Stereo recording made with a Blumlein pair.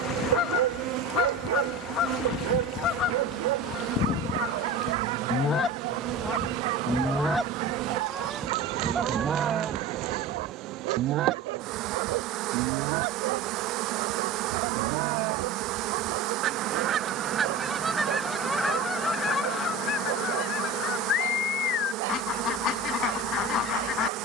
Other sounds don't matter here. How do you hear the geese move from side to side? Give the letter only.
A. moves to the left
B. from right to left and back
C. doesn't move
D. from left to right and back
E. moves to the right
D.